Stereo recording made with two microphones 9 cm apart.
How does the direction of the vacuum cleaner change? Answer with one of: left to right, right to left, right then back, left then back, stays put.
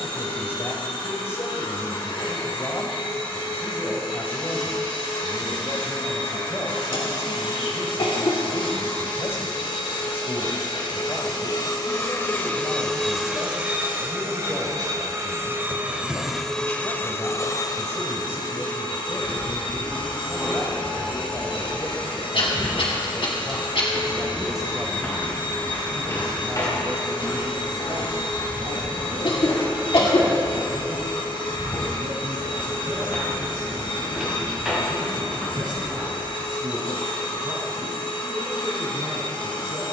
right then back.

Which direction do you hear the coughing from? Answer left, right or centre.
left.